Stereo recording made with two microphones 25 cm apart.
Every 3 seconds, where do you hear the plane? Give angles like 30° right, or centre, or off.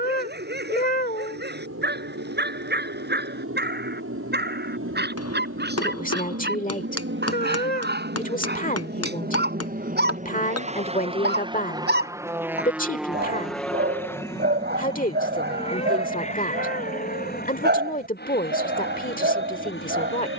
70° right, 70° right, 50° right, 30° right, centre, 30° left, 40° left.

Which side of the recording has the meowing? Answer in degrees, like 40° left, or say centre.
40° left.